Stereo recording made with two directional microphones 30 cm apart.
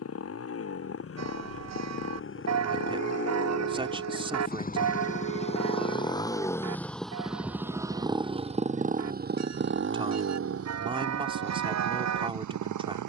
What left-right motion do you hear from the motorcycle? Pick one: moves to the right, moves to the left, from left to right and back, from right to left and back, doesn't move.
moves to the right.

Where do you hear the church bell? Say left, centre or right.
right.